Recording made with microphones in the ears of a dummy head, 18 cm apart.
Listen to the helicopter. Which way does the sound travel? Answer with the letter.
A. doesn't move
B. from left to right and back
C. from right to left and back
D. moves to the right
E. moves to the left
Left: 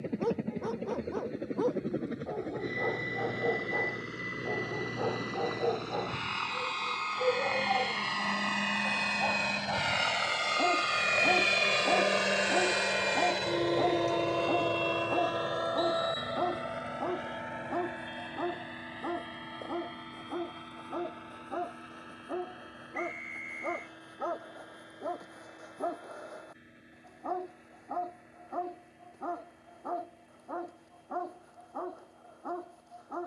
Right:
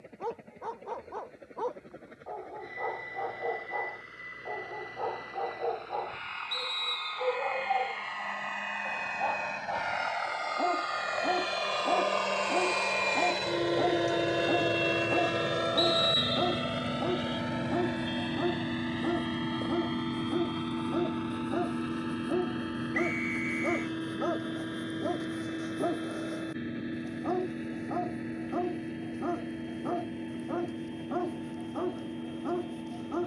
D.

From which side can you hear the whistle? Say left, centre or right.
right.